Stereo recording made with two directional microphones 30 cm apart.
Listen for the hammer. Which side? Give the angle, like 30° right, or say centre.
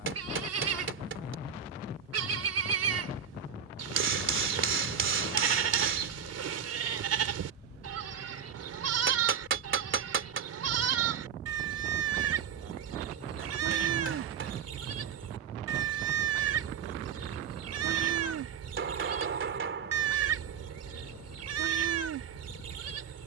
40° right.